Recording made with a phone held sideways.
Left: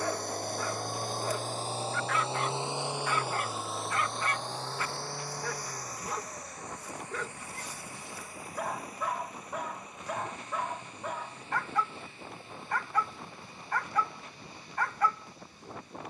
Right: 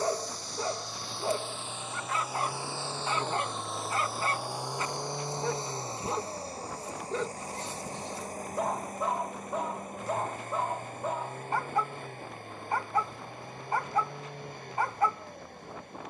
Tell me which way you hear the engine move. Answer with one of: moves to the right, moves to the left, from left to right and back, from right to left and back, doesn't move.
moves to the right.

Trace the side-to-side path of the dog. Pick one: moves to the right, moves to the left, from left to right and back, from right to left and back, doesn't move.
doesn't move.